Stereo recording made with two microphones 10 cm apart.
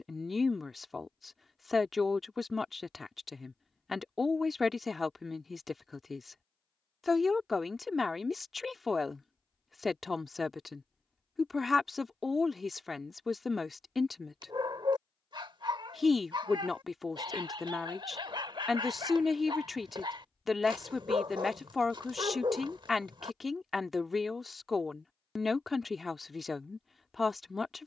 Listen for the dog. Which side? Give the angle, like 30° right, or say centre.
50° right.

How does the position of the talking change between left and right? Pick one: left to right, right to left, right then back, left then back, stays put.
stays put.